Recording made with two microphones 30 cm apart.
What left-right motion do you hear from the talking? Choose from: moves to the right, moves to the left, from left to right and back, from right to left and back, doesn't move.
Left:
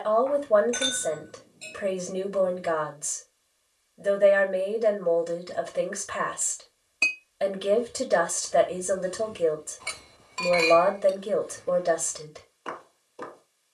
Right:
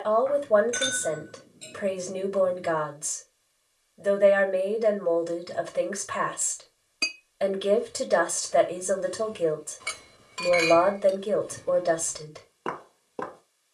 doesn't move.